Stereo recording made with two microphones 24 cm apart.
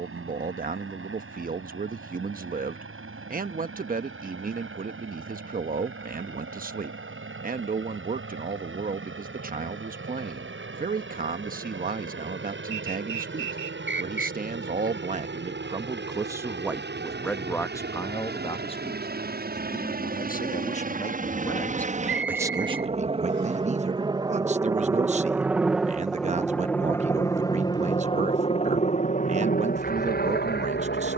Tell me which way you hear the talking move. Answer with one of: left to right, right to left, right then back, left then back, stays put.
left then back.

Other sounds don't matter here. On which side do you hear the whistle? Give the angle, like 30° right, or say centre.
50° right.